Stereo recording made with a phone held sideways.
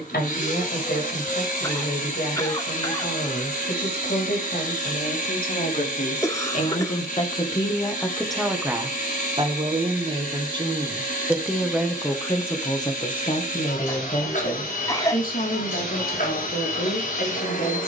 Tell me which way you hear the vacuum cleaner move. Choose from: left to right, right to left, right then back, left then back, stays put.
stays put.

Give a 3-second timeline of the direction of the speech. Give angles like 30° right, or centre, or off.
70° left, 60° left, 20° left, 20° right, 30° left, 60° left.